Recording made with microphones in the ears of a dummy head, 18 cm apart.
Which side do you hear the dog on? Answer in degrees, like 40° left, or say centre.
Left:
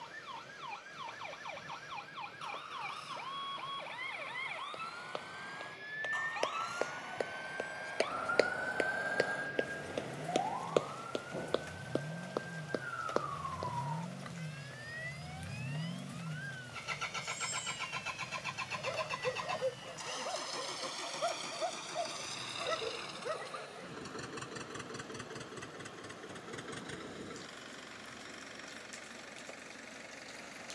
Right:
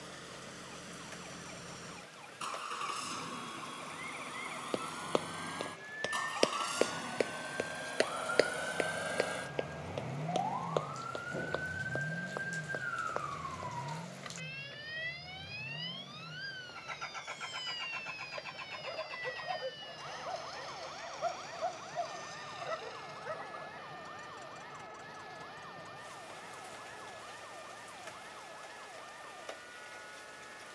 40° left.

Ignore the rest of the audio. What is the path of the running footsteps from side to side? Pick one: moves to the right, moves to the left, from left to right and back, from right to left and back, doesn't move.
moves to the left.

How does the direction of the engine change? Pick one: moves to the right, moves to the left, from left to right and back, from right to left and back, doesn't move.
moves to the left.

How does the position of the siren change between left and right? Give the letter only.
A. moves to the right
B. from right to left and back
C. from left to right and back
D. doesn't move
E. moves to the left
A.